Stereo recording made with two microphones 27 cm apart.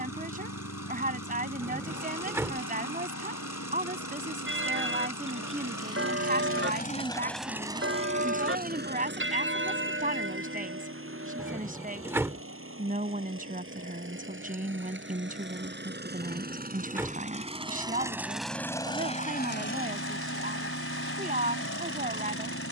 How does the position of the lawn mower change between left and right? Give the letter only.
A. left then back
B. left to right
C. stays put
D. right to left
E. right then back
E.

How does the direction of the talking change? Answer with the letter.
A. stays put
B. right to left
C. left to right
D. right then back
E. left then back
A.